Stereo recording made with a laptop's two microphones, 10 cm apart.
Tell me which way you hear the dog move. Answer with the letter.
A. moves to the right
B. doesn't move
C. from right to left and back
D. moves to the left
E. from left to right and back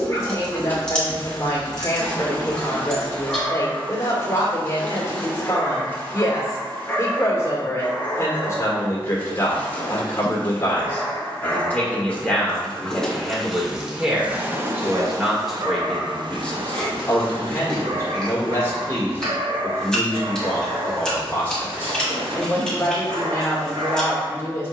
A.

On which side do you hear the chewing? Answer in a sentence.
You can hear the chewing in the centre.